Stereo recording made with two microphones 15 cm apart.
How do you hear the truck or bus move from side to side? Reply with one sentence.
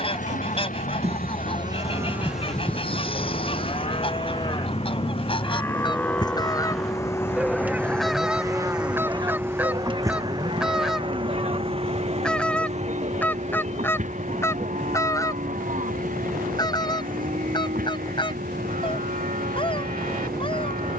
You can hear the truck or bus travel towards the right.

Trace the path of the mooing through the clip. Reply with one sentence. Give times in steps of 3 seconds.
In this clip you hear the mooing on the right from 0 s, on the left from 3 s, in the centre from 6 s and on the right from 9 s.